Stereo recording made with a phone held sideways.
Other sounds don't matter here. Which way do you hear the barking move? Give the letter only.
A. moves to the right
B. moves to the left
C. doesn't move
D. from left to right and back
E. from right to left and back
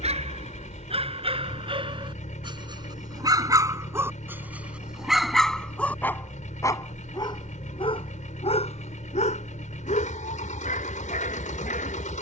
B.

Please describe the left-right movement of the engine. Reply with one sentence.
In this clip you hear the engine stay in one place.